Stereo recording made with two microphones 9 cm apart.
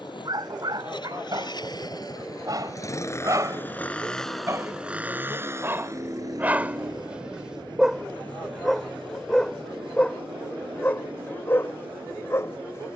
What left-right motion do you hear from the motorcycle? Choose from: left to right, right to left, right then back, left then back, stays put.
left to right.